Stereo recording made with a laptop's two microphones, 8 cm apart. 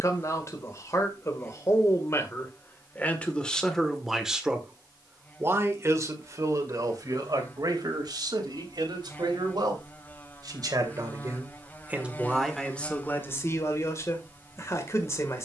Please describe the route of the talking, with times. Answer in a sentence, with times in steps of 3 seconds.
In this clip you hear the talking on the left from 0 s, in the centre from 3 s, on the right from 6 s and on the left from 12 s.